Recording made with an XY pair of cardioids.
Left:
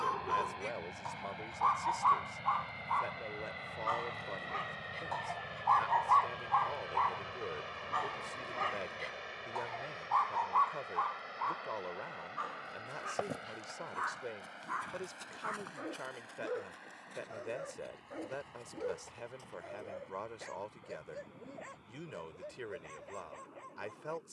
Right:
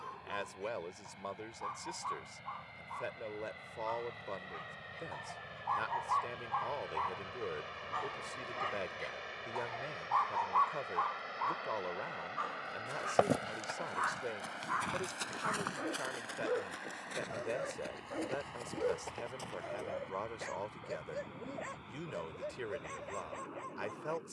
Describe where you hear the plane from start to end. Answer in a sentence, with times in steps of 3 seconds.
In this clip you hear the plane on the left from 0 s, in the centre from 6 s and on the right from 12 s.